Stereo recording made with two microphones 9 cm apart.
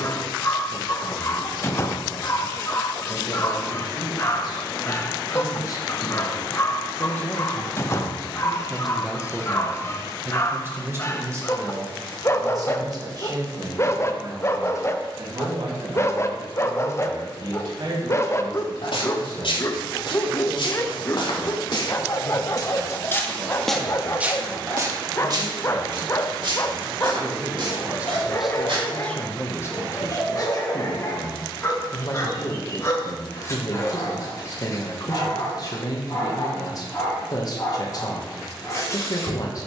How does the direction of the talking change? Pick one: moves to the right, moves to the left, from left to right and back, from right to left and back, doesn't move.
from left to right and back.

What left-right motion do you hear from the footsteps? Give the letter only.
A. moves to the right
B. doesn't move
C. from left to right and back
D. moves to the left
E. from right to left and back
A.